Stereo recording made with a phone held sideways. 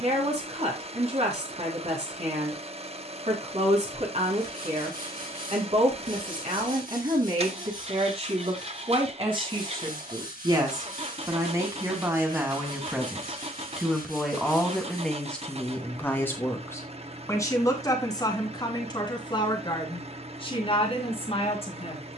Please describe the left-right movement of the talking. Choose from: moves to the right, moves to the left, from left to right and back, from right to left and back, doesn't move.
moves to the left.